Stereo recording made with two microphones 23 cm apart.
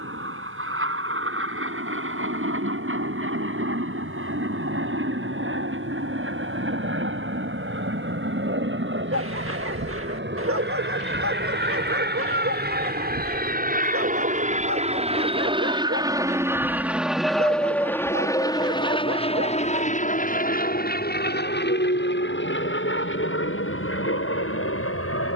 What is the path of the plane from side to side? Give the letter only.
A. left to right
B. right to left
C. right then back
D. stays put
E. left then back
B.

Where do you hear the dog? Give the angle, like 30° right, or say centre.
70° right.